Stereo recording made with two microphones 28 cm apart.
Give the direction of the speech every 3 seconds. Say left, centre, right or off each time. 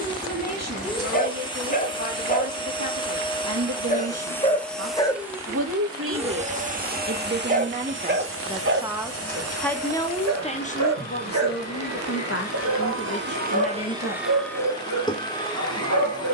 right, right, right, left, left, off.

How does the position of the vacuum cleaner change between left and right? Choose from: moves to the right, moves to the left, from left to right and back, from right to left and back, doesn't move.
from left to right and back.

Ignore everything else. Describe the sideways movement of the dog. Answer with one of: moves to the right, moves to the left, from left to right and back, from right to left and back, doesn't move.
moves to the right.